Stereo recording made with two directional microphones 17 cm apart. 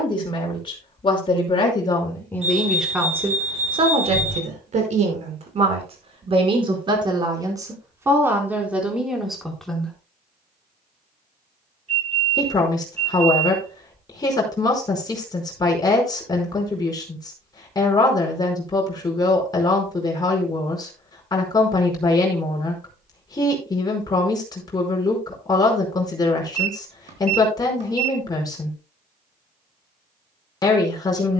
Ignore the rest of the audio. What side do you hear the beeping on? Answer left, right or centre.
right.